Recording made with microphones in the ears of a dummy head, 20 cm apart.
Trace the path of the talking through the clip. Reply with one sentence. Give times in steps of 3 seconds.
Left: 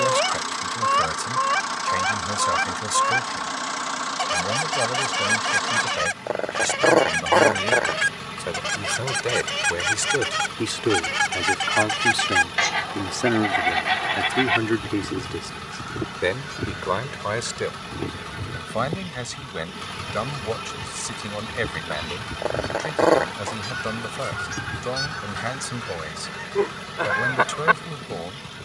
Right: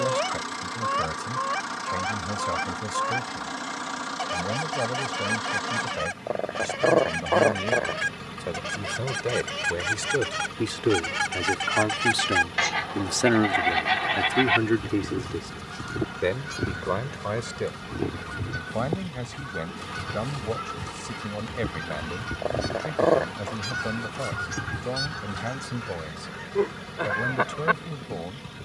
In this clip you hear the talking on the left from 0 s, in the centre from 12 s and on the left from 15 s.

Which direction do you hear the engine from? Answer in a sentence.
You can hear the engine on the left.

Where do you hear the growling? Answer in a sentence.
In this clip you hear the growling on the left.